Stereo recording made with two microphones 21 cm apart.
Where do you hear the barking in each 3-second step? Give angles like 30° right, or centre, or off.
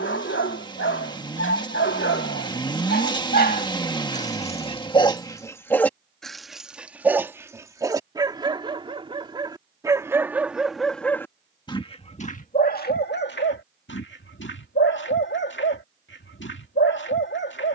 70° left, 30° left, 10° right, 10° right, 50° left, 60° left.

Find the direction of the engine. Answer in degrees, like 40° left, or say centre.
20° left.